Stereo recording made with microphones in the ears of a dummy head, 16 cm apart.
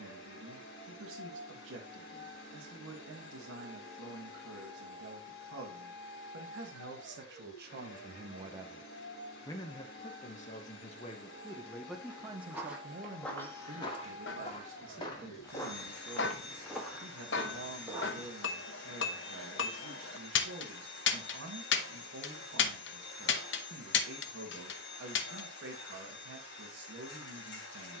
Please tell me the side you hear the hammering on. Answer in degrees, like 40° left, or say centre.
70° left.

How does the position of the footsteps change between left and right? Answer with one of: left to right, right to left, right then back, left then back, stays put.
left then back.